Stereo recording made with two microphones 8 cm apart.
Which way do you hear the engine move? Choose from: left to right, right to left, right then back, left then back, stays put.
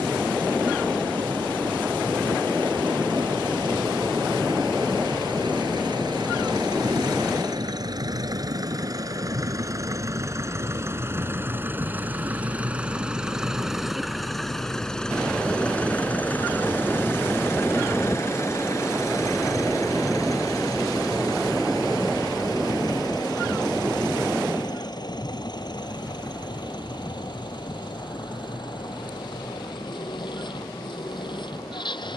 right to left.